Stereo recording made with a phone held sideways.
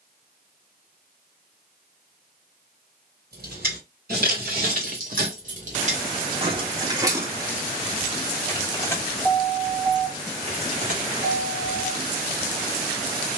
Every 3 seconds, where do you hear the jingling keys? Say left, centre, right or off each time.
off, right, centre, right, off.